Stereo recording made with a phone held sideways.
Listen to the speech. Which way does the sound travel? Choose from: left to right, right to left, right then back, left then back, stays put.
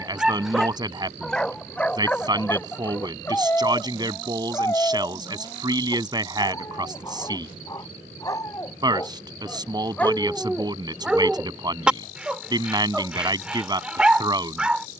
stays put.